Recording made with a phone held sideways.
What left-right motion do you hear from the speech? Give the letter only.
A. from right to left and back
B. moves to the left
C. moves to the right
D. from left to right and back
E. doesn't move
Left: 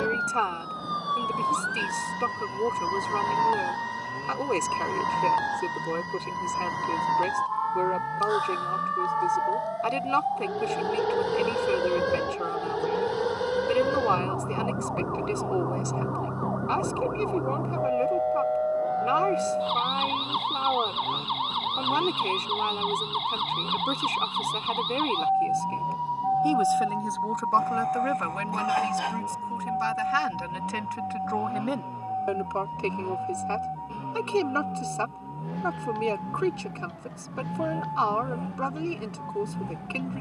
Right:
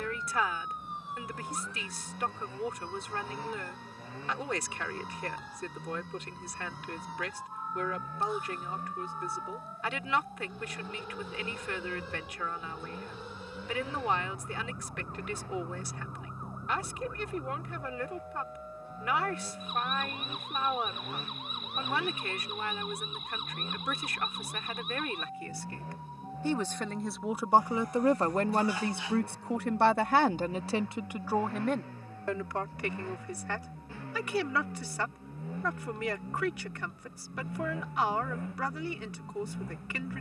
D.